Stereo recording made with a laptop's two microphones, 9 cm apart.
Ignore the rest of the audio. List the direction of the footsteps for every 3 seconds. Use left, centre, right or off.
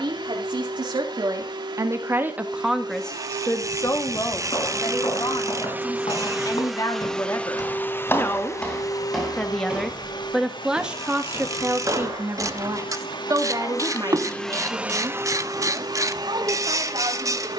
off, left, left, right, right, off.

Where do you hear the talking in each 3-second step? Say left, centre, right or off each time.
right, left, left, centre, right, right.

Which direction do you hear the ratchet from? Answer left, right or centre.
right.